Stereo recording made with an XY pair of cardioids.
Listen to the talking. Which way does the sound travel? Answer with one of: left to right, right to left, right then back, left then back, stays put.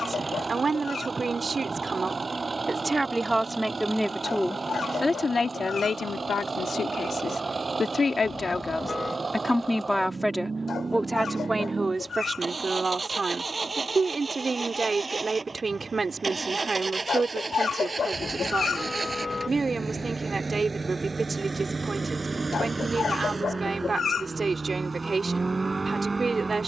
left then back.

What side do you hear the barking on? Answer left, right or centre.
left.